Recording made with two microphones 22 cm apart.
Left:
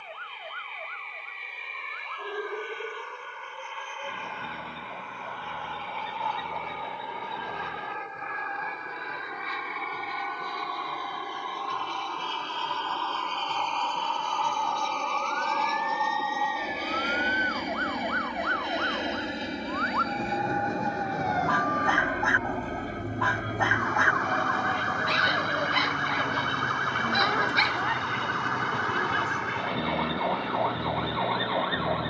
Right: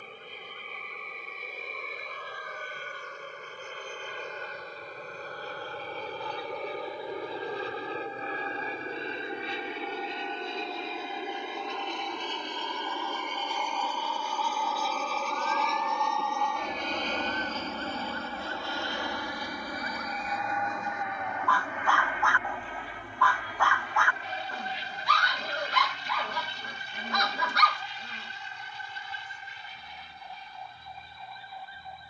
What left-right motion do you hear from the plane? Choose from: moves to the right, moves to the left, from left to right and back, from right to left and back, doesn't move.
moves to the left.